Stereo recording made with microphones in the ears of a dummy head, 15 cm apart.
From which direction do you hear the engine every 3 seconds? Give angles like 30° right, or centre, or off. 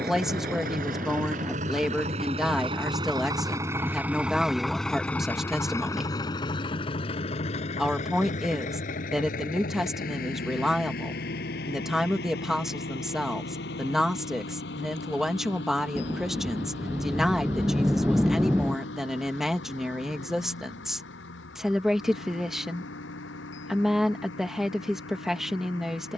40° right, centre, 40° left, 50° left, 60° left, 70° left, 70° left, 70° left, 70° left.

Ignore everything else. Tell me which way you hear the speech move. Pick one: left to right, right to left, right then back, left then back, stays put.
stays put.